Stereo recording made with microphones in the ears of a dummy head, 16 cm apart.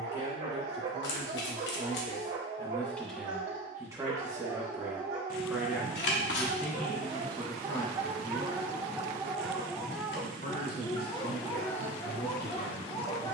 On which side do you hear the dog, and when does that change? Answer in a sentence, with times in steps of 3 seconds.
In this clip you hear the dog on the right from 0 s, in the centre from 9 s and on the left from 12 s.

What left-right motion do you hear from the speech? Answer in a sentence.
You can hear the speech go right and come back.